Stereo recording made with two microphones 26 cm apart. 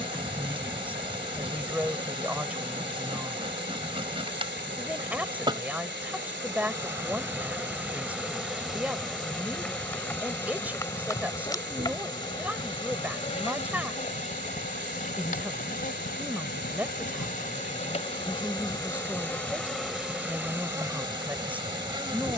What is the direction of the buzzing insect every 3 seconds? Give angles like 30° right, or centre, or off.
20° right, 20° right, 10° right, 10° left, 20° left, 30° left, centre, 20° right.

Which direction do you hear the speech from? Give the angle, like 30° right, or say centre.
10° right.